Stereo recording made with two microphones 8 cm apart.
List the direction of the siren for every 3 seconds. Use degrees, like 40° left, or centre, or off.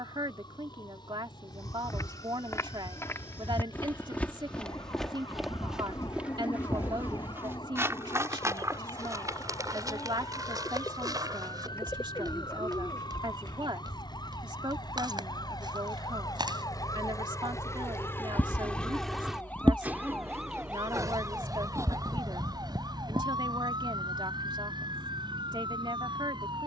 80° left, 80° left, 80° left, 70° left, 70° left, 60° left, 20° left, 50° right, 70° right.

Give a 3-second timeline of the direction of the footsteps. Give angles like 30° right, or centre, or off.
40° left, 10° left, 30° right, 50° right, 60° right, 70° right, off, off, off.